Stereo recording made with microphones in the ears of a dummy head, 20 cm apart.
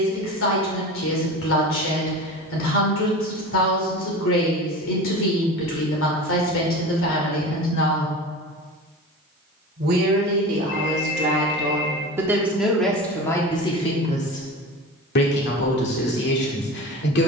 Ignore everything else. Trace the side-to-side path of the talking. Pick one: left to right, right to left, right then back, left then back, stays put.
right then back.